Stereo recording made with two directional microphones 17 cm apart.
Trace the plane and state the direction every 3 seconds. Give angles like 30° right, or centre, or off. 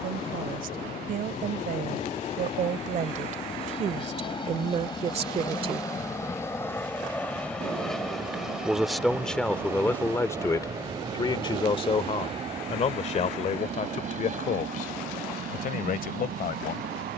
40° left, 30° left, 10° left, 20° right, 40° right, 50° right.